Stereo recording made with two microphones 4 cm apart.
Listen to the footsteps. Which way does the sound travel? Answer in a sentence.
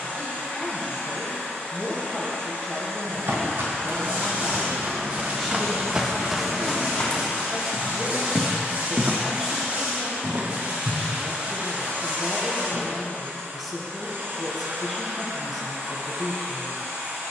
In this clip you hear the footsteps move from right to left and back again.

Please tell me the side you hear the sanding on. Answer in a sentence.
In this clip you hear the sanding on the right.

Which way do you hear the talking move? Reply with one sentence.
In this clip you hear the talking stay put.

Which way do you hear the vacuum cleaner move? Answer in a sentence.
In this clip you hear the vacuum cleaner go from the left side to the right.